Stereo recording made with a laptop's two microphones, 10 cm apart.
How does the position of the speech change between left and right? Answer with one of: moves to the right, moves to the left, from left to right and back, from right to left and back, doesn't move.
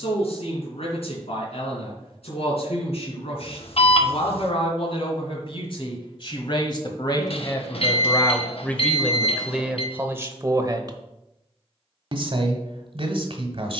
moves to the right.